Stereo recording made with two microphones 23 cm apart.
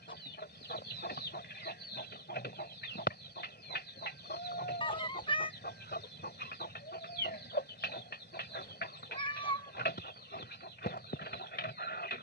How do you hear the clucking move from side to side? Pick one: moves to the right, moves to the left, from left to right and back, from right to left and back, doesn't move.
doesn't move.